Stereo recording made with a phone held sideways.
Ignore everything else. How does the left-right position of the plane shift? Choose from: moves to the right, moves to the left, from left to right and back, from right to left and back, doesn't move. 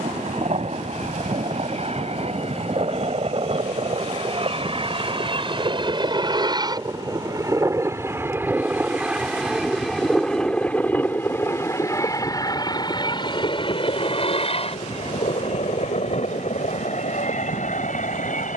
moves to the left.